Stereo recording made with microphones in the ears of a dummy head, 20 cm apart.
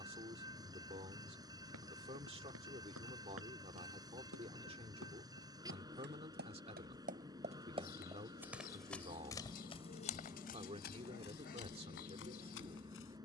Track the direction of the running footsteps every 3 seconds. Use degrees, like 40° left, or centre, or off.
70° right, 70° right, 20° right, 40° left, 60° left.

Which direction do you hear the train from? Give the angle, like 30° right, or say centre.
20° right.